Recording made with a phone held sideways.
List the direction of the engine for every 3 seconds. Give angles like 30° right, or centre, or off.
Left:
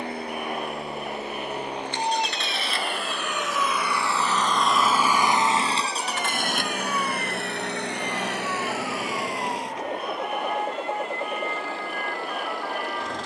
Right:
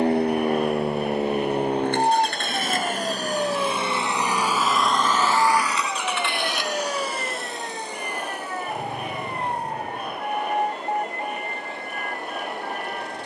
50° right, 10° right, 60° left, 80° left, 80° left.